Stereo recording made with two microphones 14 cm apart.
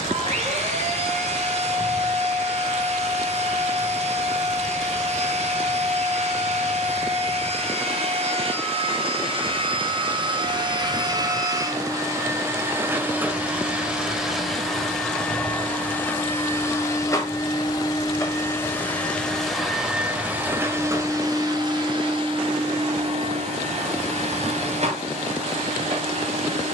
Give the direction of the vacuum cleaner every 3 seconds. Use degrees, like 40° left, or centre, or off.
50° right, 50° right, 50° right, 30° right, 10° right, 20° left, centre, 40° right, 50° right.